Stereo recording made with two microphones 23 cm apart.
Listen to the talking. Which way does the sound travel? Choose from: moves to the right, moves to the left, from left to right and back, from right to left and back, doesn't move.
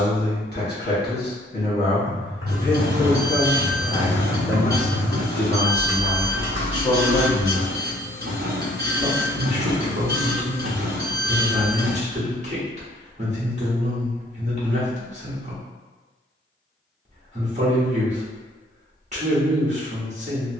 moves to the right.